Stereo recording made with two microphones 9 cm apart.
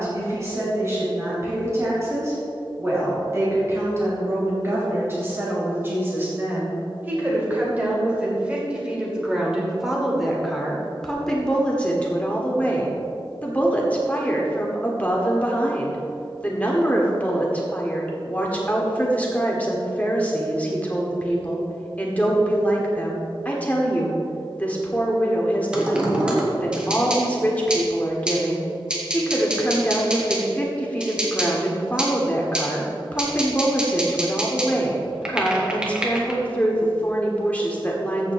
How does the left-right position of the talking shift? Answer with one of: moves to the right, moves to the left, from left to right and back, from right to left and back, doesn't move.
moves to the left.